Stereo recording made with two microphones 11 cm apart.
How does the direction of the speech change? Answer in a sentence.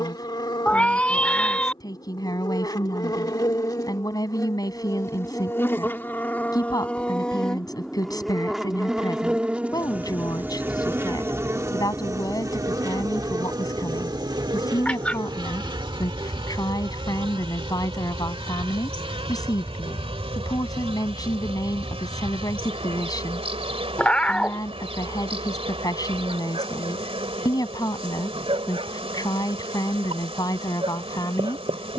In this clip you hear the speech stay put.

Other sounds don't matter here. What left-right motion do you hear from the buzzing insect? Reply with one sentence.
In this clip you hear the buzzing insect move from left to right.